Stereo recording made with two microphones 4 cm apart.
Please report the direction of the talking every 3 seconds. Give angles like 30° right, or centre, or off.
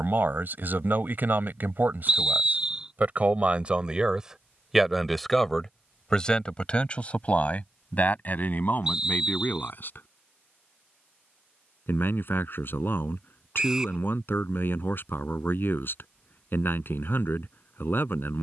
50° right, 10° right, 30° left, 50° left, 50° left, 50° left.